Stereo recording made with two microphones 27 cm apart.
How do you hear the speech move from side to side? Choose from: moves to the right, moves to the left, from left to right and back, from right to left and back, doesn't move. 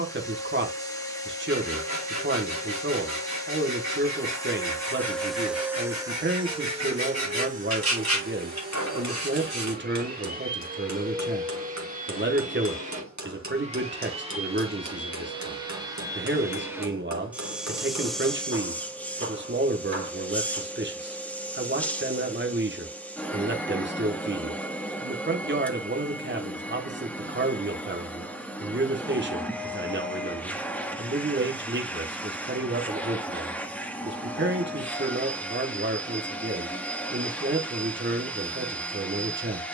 doesn't move.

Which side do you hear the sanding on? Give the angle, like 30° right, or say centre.
80° left.